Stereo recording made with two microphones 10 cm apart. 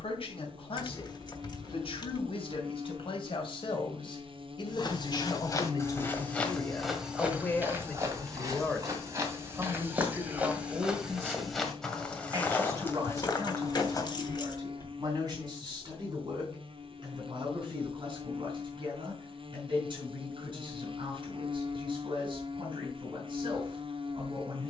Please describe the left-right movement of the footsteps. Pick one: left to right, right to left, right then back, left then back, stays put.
right then back.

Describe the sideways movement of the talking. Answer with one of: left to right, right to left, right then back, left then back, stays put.
left to right.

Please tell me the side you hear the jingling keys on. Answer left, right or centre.
left.